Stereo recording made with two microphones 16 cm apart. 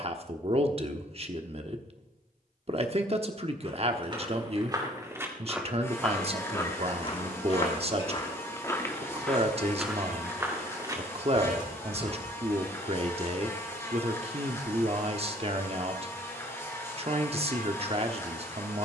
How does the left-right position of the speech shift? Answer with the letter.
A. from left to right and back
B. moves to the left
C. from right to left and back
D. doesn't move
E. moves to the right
D.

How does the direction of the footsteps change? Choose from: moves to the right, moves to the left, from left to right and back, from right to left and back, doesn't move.
from right to left and back.